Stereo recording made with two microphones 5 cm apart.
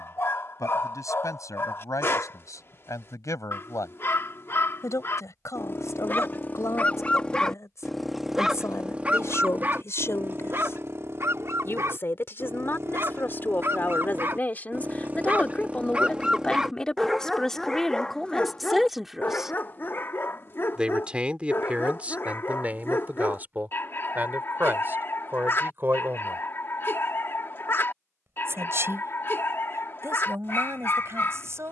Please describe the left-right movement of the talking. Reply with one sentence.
In this clip you hear the talking move from left to right.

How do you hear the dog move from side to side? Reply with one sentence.
You can hear the dog go right and come back.